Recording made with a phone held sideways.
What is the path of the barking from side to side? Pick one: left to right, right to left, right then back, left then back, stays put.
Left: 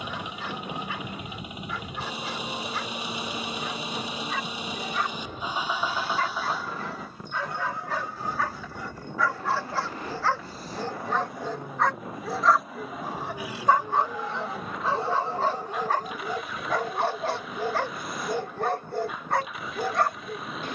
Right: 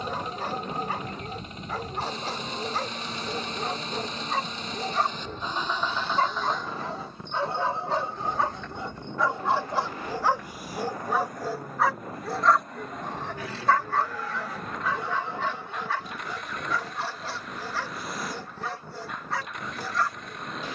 right to left.